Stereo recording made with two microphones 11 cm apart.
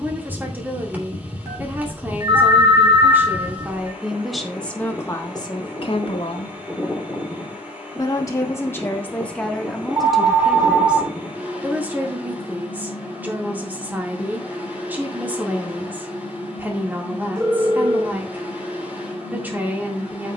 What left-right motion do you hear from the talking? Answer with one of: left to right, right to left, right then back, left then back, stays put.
left then back.